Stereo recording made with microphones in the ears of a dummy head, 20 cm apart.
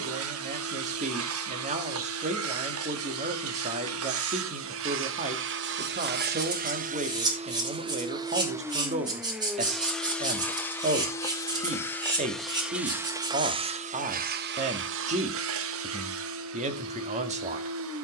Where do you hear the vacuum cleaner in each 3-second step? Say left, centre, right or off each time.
right, right, right, centre, right, right.